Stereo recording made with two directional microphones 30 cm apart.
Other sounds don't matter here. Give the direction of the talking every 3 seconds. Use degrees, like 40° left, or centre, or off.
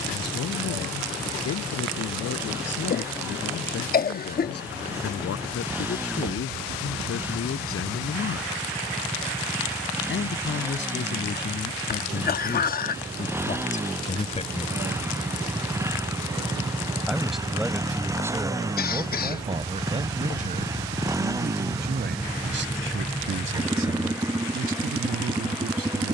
60° left, 60° left, 50° left, 40° left, 30° left, centre, 20° right, 40° right, 50° right.